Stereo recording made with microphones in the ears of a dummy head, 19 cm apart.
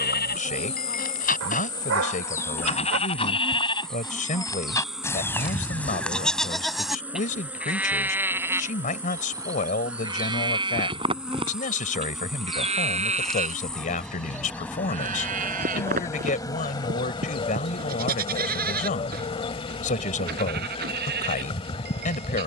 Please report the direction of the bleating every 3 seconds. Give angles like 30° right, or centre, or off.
40° left, 20° left, centre, 20° right, 30° right, 40° right, 50° right, 50° right.